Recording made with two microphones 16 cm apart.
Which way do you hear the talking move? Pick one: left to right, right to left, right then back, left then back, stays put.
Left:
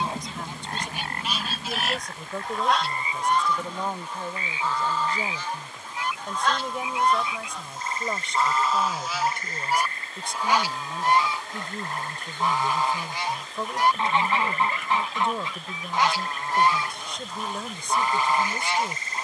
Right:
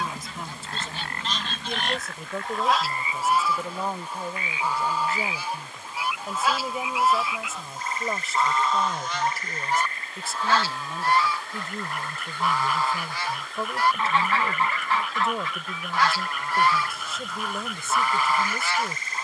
stays put.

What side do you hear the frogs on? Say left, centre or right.
left.